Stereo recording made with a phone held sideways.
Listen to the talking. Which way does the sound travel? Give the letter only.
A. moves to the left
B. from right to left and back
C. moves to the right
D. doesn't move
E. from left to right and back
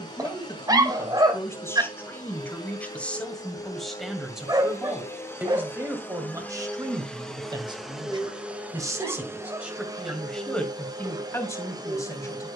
E.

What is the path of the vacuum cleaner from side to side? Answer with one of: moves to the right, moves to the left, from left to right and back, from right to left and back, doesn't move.
moves to the right.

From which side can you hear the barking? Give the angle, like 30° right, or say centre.
30° right.